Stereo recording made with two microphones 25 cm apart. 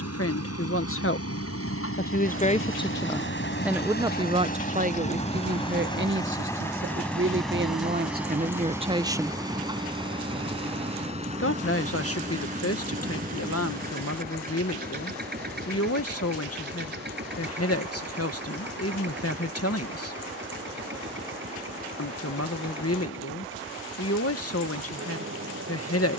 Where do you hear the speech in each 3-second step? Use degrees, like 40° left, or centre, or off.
40° left, 20° right, 40° right, 30° left, 60° left, 60° left, 60° left, 60° left, 60° left.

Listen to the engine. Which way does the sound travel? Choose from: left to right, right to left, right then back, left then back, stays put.
left to right.